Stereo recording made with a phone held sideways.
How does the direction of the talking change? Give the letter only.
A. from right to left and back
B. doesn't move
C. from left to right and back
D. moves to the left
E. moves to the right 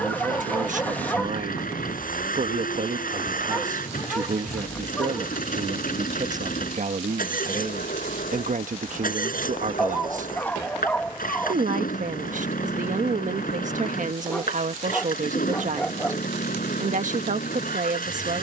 B.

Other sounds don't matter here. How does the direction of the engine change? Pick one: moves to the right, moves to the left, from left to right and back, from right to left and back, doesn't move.
doesn't move.